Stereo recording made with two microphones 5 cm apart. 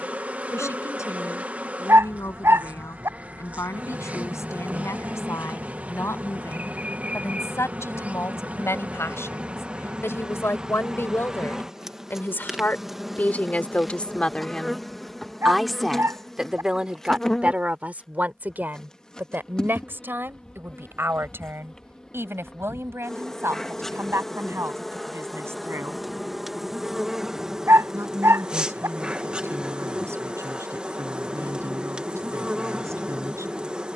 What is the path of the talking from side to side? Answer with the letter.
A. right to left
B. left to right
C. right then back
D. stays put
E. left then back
B.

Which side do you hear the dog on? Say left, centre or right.
right.